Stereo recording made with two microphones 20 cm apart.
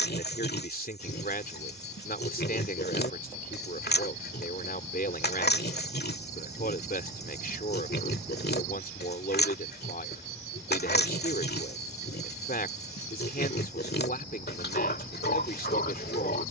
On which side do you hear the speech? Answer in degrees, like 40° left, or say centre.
50° left.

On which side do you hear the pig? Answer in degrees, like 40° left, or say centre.
60° left.